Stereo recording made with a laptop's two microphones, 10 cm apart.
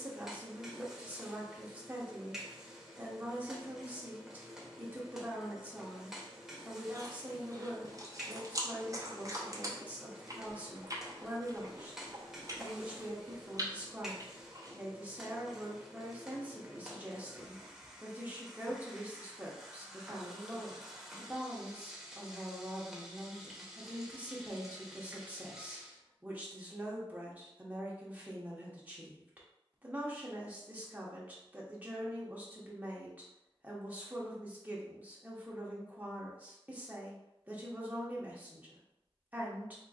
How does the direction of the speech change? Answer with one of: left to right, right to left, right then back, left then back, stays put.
stays put.